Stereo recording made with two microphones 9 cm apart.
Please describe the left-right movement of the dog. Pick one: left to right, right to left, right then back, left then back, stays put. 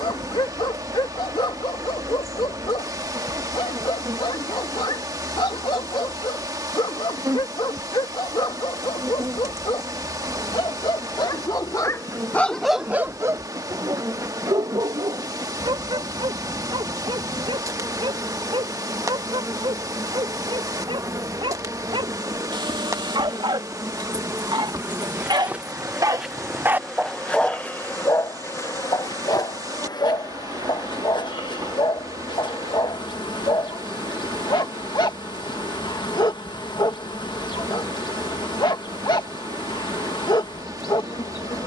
right then back.